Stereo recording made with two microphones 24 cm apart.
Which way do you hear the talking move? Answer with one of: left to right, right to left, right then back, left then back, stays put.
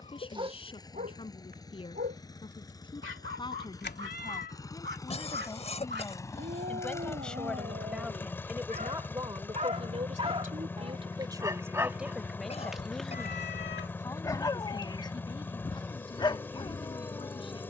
right then back.